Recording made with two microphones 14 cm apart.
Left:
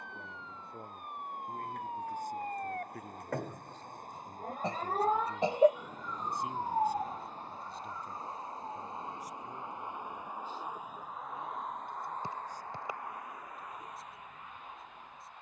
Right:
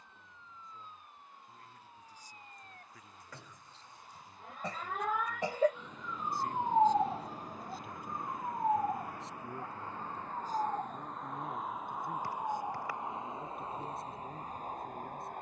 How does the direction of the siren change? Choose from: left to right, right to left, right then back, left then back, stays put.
left to right.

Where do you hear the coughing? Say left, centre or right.
left.